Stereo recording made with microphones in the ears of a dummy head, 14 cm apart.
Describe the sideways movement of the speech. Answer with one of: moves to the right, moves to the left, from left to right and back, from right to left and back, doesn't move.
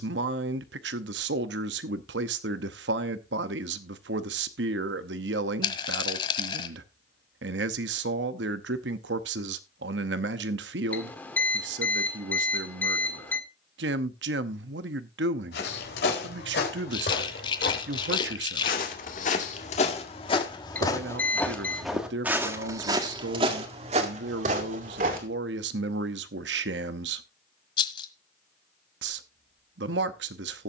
doesn't move.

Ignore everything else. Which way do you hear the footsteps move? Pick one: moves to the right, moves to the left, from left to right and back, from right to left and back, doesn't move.
moves to the right.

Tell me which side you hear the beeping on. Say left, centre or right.
centre.